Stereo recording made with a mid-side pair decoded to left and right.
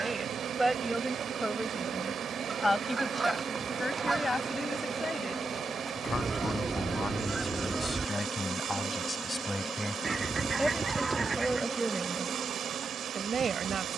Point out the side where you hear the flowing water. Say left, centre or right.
right.